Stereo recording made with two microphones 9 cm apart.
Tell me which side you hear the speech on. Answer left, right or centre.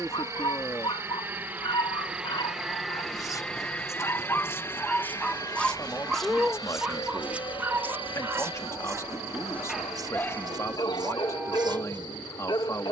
left.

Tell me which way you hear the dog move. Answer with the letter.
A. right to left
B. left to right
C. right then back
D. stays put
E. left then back
C.